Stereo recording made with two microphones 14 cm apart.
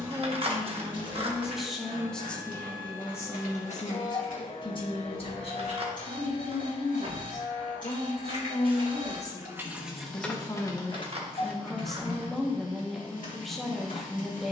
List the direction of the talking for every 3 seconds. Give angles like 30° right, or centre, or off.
centre, 30° left, 50° left, 20° left, centre.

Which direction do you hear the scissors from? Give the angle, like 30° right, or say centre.
40° right.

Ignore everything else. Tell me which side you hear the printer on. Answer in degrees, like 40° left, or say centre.
70° left.